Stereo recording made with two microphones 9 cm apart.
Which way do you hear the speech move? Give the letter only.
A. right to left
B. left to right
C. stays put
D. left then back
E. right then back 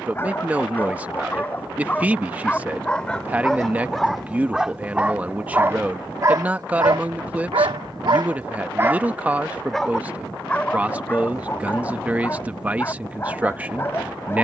C.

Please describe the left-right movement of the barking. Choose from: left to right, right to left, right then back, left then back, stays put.
right then back.